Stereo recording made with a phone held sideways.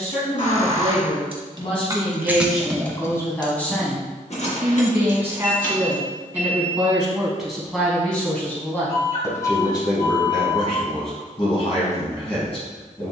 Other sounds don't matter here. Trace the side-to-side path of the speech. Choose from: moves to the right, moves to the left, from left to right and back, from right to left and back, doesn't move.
from left to right and back.